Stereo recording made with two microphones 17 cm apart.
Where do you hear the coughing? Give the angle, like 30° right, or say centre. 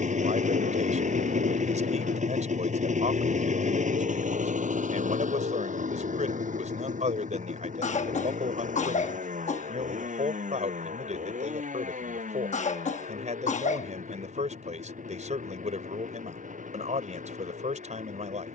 50° left.